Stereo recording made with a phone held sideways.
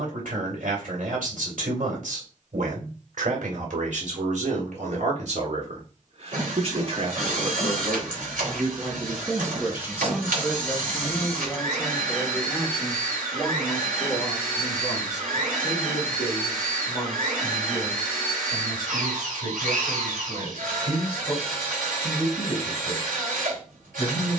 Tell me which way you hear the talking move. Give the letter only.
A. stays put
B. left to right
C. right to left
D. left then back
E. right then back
C.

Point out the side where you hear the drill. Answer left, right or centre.
right.